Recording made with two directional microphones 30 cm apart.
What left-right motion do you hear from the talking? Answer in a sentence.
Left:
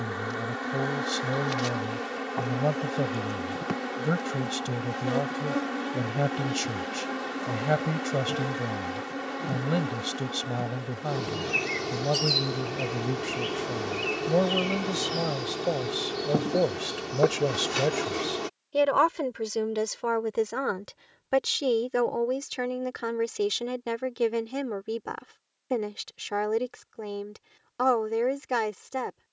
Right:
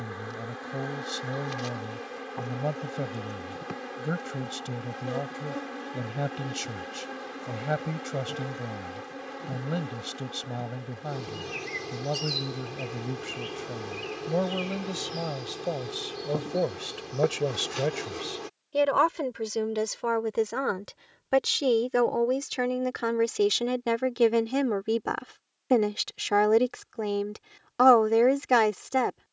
In this clip you hear the talking go from the left side to the right.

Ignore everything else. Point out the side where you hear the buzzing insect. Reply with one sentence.
You can hear the buzzing insect on the left.